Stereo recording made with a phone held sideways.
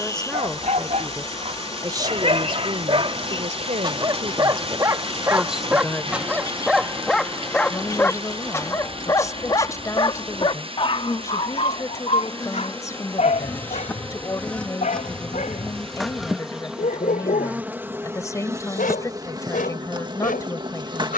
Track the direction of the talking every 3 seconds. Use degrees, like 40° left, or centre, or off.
20° right, 30° right, 20° left, 20° left, 20° left, 20° left, 20° left.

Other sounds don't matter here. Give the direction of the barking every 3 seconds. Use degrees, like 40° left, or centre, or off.
50° right, 30° right, 10° left, 40° left, 50° left, 60° left, 70° left.